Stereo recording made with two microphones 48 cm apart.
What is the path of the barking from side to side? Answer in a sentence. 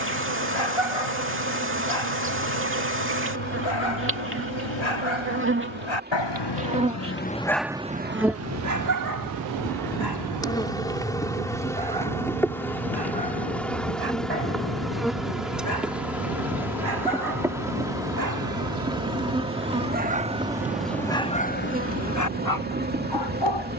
You can hear the barking move from left to right and back again.